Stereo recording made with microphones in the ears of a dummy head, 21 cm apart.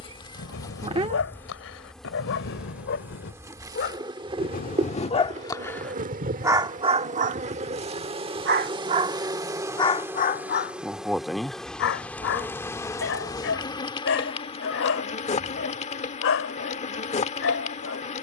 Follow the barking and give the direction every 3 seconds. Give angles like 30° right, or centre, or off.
60° left, 30° left, 30° right, 30° left, 60° left, 60° left.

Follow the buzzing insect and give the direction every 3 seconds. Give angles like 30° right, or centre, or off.
10° left, 20° right, 30° right, 10° right, 20° left, 30° left.